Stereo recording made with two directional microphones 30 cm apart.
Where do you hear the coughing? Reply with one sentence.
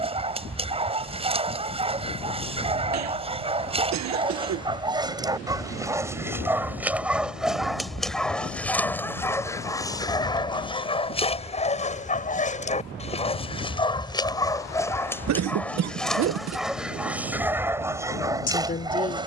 In this clip you hear the coughing on the right.